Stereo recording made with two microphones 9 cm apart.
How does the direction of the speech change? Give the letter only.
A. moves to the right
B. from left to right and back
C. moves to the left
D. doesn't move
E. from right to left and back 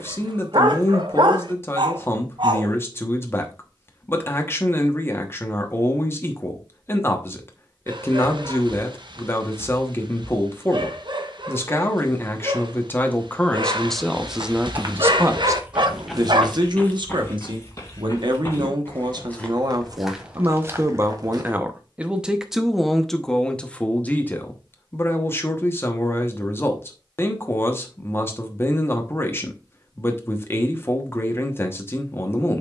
B.